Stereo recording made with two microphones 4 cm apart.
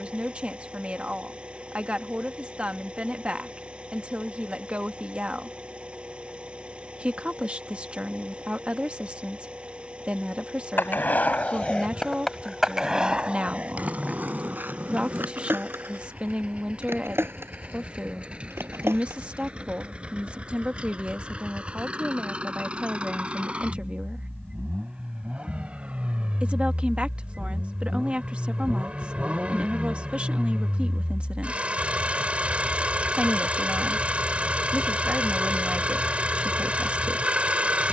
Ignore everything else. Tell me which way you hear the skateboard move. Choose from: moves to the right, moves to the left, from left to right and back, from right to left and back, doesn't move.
moves to the right.